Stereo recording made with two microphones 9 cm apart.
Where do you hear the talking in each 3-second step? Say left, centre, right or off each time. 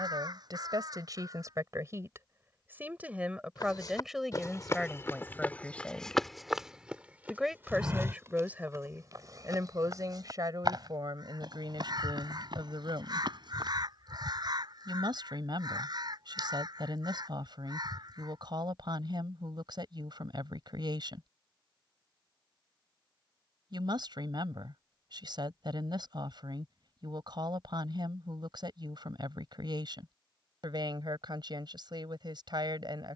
right, centre, centre, right, right, right, right, right, right, right, right.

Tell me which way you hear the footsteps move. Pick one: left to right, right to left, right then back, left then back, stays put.
left to right.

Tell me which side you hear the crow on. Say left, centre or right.
right.